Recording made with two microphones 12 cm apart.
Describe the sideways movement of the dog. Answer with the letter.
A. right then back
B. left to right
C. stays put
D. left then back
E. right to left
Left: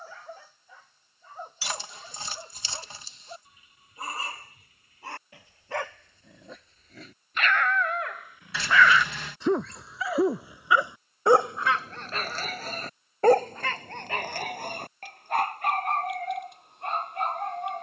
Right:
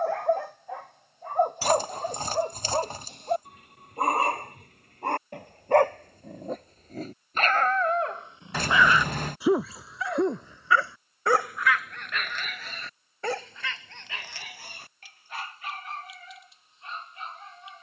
E.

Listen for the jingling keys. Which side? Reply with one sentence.
You can hear the jingling keys on the right.